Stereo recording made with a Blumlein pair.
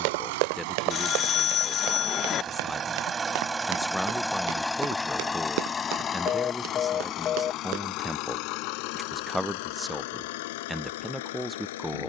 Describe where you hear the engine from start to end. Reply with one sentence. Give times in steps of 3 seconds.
In this clip you hear the engine on the right from 0 s, in the centre from 3 s and on the left from 6 s.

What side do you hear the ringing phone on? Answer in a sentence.
In this clip you hear the ringing phone on the left.